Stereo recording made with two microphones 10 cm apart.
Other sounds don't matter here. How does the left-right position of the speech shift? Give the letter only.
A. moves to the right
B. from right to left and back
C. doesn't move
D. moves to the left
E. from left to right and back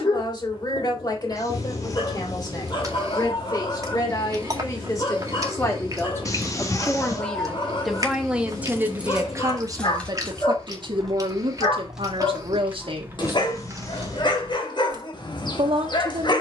A.